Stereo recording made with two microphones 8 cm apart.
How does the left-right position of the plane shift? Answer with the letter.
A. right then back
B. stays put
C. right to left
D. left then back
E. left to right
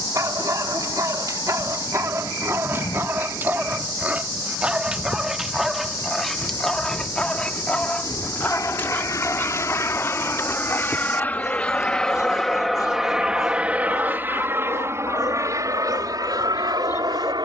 E.